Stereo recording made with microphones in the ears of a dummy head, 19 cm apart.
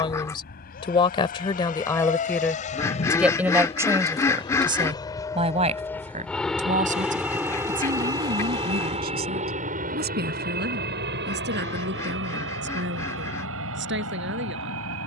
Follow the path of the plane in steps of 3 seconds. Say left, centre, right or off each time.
left, left, centre, right, right.